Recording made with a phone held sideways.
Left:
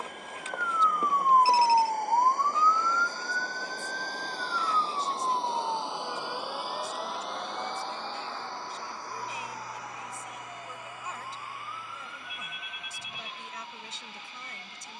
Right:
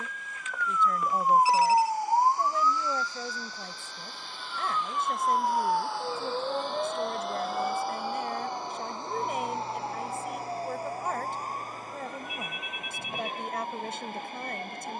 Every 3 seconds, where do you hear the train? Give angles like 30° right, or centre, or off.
70° left, 40° left, centre, 30° right, 50° right.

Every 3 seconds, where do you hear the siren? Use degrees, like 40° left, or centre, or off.
centre, 30° right, 40° right, 50° right, 50° right.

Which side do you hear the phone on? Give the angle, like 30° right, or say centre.
30° left.